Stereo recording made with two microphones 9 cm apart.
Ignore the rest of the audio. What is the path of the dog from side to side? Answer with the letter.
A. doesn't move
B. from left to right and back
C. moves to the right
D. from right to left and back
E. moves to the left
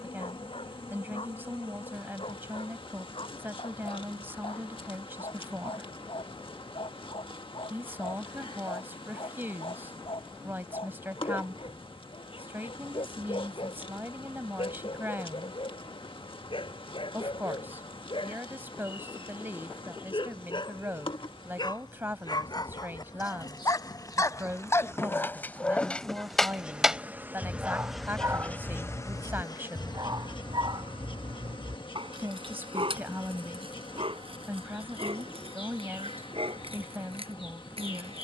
C.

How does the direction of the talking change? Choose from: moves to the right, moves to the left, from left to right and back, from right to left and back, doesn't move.
doesn't move.